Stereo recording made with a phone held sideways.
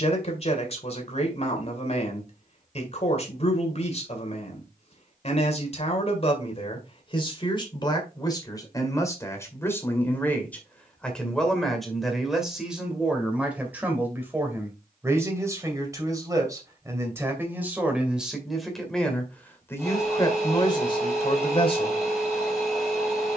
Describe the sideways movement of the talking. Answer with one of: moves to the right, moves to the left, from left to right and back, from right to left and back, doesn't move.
from left to right and back.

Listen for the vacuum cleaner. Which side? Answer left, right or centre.
centre.